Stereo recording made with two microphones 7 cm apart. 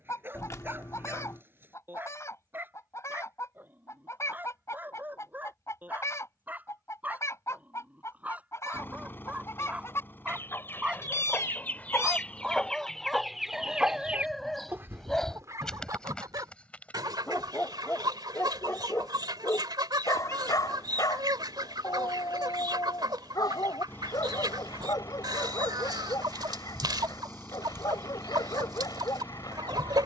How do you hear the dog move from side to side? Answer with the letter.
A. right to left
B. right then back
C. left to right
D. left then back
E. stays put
A.